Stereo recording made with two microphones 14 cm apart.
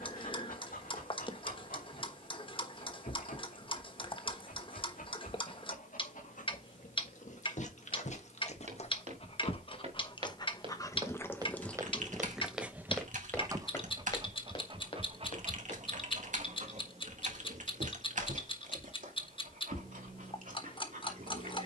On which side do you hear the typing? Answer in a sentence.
In this clip you hear the typing on the right.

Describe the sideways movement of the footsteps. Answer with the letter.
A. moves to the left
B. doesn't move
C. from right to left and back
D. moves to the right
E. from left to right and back
A.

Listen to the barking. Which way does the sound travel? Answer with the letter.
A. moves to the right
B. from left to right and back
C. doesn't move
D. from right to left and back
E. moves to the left
A.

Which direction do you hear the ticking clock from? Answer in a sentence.
You can hear the ticking clock on the left.